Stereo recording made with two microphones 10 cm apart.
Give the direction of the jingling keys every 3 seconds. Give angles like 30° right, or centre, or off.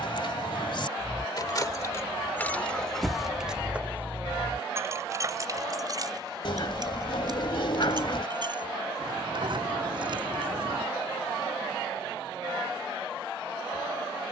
30° left, 20° right, 50° right, 50° right, off.